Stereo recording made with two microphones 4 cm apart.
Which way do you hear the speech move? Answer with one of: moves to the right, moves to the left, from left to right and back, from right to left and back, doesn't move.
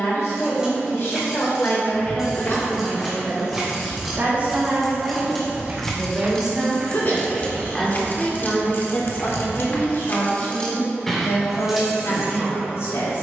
from left to right and back.